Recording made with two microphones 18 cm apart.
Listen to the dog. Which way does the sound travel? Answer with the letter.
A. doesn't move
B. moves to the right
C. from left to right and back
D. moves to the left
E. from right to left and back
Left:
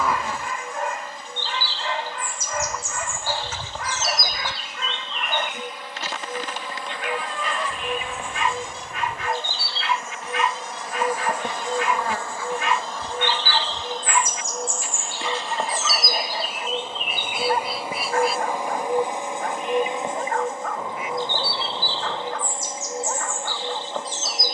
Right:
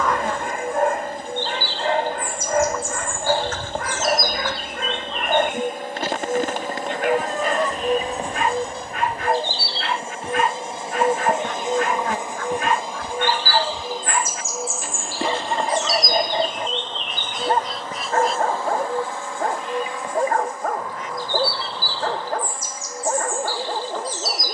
A.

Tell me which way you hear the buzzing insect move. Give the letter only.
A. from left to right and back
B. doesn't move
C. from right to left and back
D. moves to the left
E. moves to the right
D.